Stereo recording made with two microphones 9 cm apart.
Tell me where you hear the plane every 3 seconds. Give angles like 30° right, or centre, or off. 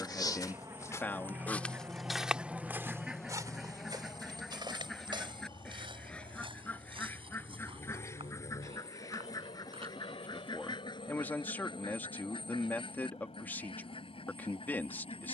30° right, 30° left, 60° left, 60° left, 70° left.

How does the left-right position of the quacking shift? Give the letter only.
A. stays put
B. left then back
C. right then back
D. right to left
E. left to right
D.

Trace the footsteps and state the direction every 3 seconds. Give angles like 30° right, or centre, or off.
10° left, 50° right, 70° right, 80° right, off.